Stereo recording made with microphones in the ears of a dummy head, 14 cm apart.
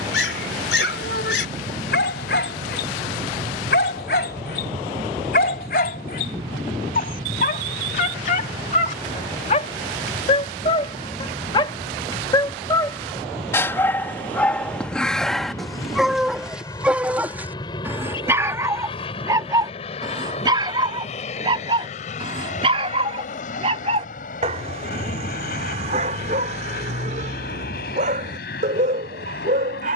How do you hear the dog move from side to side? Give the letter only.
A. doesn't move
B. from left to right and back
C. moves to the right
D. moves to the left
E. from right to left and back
C.